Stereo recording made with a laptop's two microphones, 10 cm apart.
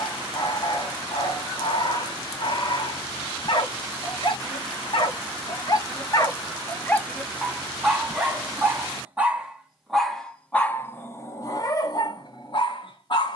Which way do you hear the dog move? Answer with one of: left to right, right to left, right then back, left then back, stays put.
right then back.